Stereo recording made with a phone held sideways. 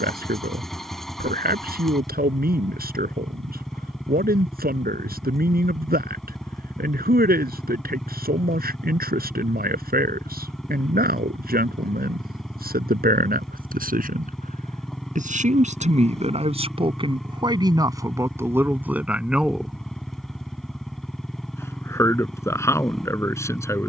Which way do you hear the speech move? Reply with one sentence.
In this clip you hear the speech move from right to left.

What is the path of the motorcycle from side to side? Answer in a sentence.
In this clip you hear the motorcycle stay in one place.